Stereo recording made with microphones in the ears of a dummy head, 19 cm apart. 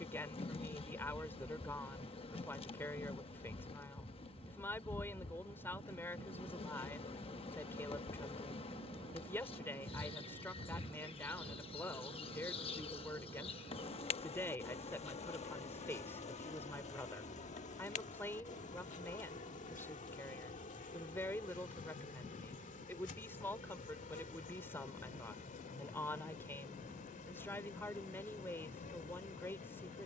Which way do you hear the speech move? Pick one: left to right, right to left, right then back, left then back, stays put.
stays put.